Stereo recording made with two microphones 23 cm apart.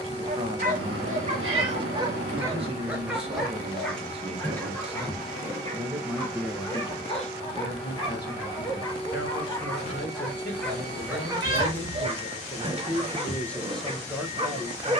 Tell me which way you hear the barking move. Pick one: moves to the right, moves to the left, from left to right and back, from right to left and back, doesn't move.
from right to left and back.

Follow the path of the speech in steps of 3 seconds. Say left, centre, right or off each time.
right, right, left, left, centre.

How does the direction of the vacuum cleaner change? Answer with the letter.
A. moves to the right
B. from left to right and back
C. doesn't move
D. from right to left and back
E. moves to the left
C.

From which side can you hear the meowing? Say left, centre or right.
right.